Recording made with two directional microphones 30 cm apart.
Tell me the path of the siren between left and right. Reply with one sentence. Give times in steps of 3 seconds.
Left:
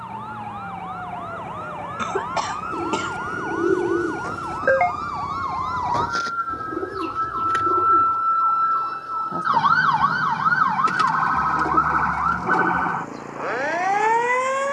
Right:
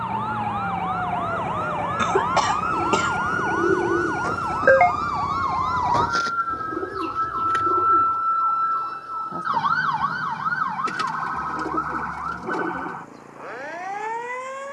You can hear the siren on the right from 0 s, in the centre from 6 s and on the left from 9 s.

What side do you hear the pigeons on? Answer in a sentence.
In this clip you hear the pigeons in the centre.